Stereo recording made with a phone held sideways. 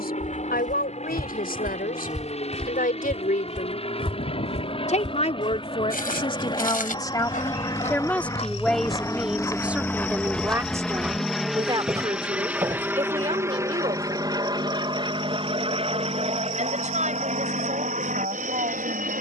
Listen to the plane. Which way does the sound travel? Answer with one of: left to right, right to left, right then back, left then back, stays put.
left to right.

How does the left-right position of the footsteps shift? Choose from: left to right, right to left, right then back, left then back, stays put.
left then back.